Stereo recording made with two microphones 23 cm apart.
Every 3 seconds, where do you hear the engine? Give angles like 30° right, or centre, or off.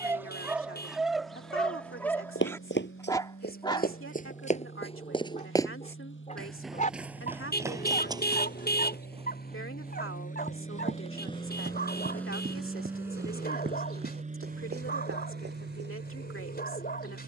70° left, 70° left, 60° left, 30° left, 20° right, 60° right.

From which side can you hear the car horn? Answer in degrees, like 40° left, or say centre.
50° left.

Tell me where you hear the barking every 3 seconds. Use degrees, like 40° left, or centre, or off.
centre, 20° left, 40° left, 40° left, 40° left, 40° left.